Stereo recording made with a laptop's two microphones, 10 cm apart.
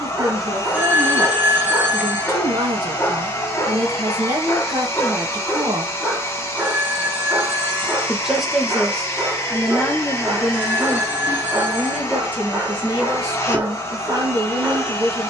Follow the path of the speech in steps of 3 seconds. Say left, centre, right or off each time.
right, right, centre, centre, right.